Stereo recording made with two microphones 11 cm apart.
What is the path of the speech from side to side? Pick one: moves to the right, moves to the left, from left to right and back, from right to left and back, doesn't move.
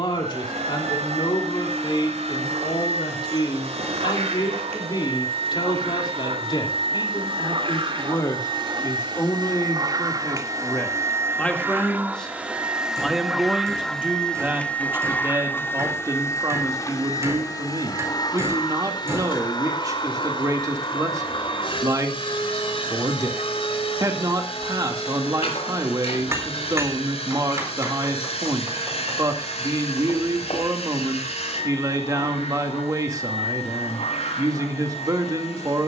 moves to the right.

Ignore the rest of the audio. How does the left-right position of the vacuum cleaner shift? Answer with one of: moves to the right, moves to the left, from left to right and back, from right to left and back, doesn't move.
moves to the left.